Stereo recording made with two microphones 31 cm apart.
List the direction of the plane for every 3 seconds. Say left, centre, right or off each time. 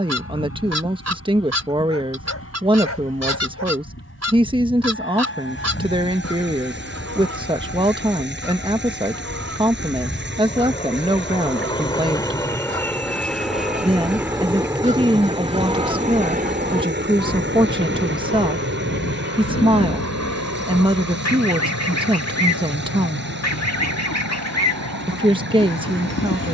left, left, left, left, centre, right, right, right, right.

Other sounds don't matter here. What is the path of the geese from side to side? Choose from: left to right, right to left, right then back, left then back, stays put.
right to left.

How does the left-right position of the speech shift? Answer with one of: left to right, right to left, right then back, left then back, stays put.
stays put.